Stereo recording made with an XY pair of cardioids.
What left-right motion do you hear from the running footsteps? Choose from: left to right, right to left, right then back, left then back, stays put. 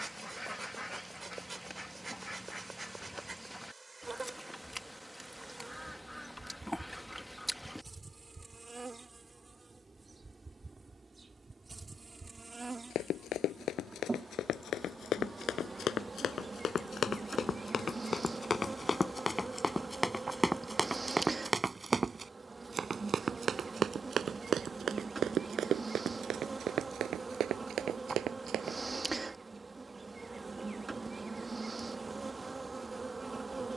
left to right.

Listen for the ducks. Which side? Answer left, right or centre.
centre.